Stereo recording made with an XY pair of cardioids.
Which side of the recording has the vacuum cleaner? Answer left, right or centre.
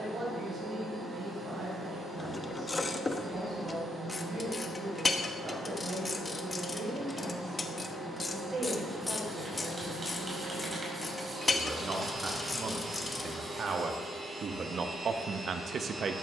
right.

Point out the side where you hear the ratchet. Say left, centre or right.
left.